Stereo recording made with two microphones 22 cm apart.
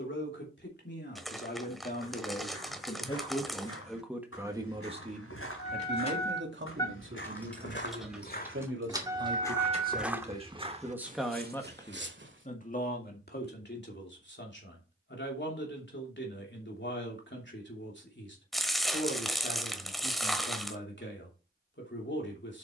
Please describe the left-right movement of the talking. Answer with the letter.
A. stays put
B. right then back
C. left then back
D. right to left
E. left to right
B.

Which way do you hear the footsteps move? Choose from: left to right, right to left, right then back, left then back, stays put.
left to right.